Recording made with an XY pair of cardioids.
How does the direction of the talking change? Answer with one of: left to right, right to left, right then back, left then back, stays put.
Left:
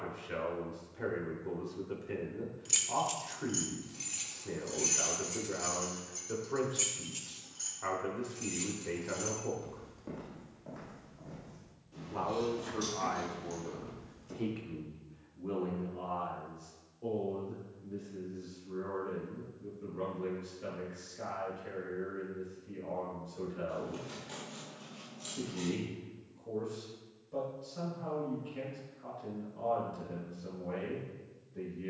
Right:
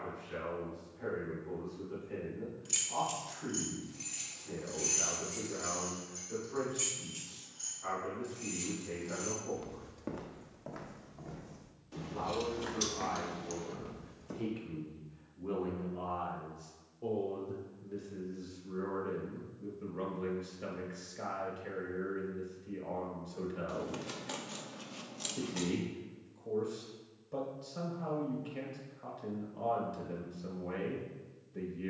left to right.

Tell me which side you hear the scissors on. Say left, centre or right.
right.